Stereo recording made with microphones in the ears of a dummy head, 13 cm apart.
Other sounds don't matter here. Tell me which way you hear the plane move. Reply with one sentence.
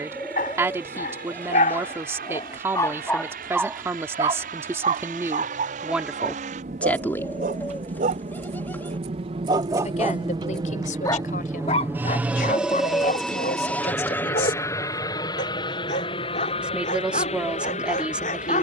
In this clip you hear the plane go from the right side to the left.